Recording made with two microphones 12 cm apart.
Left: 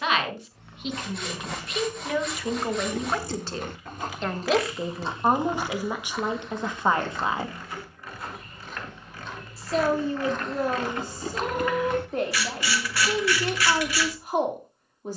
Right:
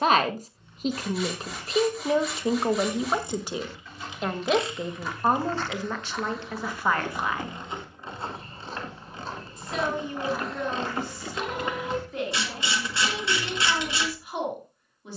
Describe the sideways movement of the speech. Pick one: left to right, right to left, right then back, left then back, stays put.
right to left.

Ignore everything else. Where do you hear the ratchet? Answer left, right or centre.
right.